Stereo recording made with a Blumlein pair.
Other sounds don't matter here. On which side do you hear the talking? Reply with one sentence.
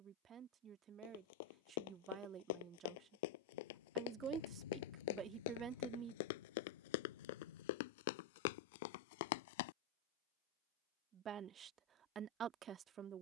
You can hear the talking on the right.